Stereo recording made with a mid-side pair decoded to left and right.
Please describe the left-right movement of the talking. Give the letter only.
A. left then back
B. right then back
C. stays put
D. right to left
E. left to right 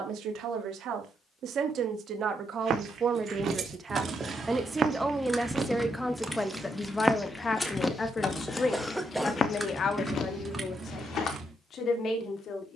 D.